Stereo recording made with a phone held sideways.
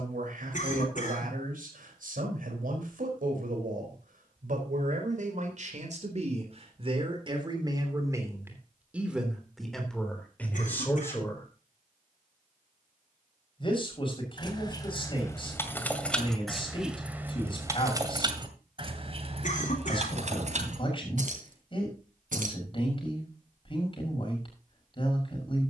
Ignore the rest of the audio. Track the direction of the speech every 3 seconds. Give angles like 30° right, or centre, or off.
70° right, 60° right, 30° right, 10° left, 30° left, 40° left, 40° left, 40° left, 40° left.